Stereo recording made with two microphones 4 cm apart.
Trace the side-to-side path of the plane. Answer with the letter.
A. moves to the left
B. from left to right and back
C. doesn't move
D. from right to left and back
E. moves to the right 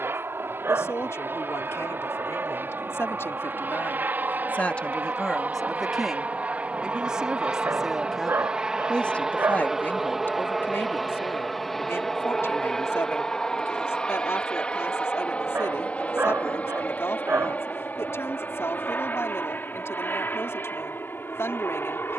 A.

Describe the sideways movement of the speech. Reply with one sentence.
You can hear the speech move from left to right and back again.